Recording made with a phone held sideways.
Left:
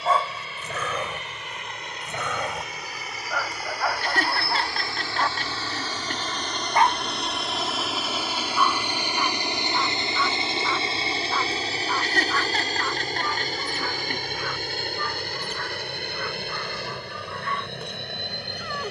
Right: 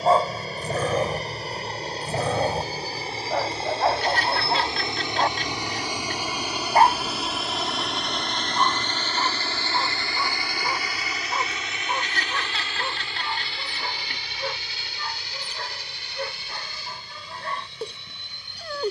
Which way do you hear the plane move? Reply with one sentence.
In this clip you hear the plane move from right to left.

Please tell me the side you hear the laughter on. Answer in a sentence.
You can hear the laughter on the left.